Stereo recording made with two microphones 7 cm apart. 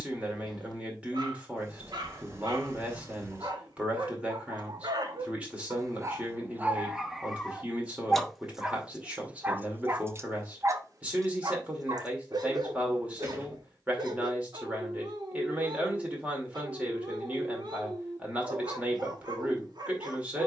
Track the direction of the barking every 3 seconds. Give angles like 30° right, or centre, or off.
80° right, 70° right, 10° right, 40° right, 70° right, 70° right, 70° right.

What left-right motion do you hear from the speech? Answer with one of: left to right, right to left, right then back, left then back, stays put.
stays put.